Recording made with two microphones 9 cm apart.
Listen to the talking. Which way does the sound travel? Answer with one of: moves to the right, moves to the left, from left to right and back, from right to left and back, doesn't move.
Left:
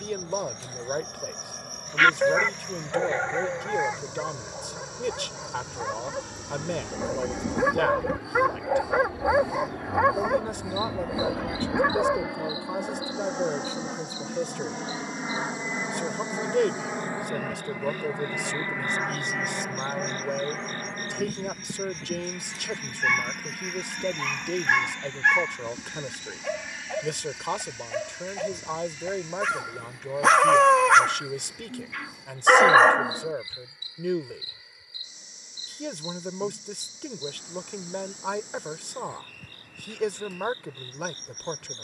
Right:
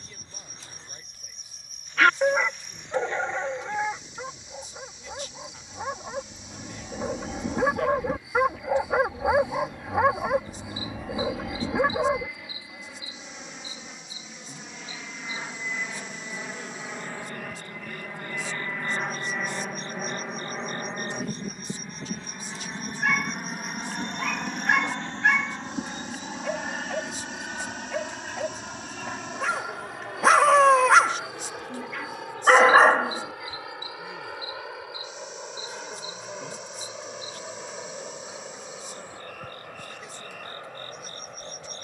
doesn't move.